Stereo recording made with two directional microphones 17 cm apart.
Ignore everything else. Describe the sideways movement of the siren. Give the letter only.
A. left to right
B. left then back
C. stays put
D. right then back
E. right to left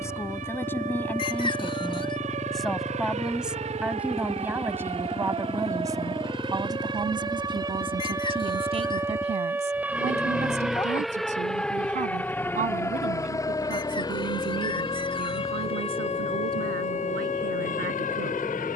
E.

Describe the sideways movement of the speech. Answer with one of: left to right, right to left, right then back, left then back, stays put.
left to right.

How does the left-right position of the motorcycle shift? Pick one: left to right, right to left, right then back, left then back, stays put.
stays put.